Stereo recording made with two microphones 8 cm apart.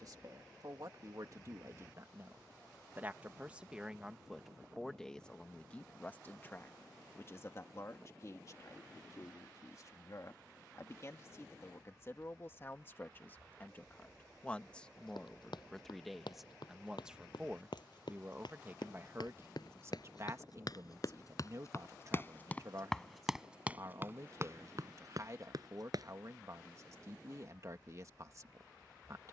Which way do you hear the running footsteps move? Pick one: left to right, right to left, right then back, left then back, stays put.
left to right.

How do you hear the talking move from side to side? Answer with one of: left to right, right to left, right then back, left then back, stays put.
left then back.